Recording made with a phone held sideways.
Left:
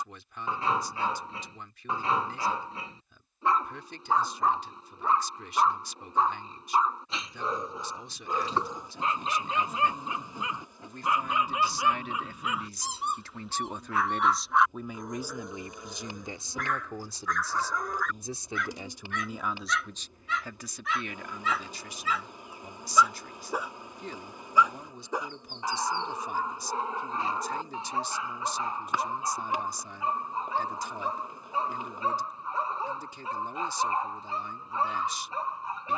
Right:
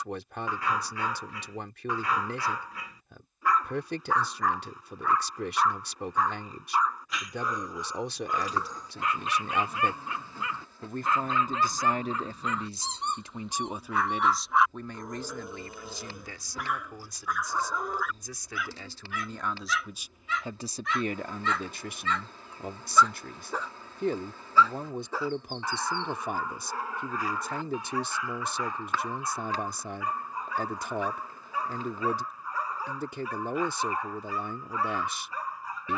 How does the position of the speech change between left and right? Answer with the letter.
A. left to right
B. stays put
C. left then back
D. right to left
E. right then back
C.